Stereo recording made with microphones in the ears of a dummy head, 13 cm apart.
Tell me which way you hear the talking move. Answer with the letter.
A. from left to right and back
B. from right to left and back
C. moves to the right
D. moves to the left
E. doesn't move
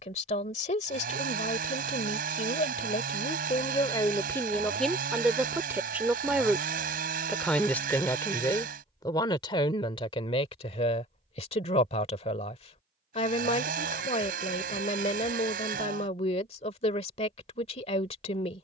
A.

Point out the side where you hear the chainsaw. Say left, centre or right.
right.